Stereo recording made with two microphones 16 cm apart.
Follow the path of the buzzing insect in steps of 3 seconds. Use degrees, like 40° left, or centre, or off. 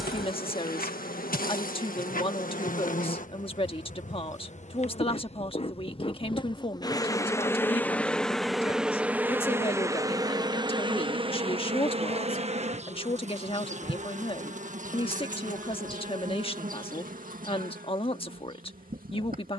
70° left, 50° left, 20° left, 30° right, 50° right, 60° right, 60° right.